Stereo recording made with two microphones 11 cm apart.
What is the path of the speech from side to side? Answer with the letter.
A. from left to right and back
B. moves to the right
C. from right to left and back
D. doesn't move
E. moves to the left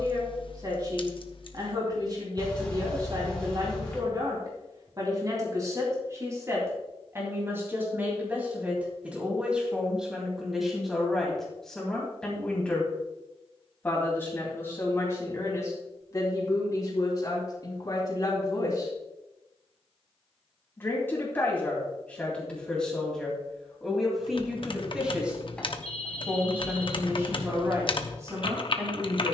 C.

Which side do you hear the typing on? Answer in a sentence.
In this clip you hear the typing on the left.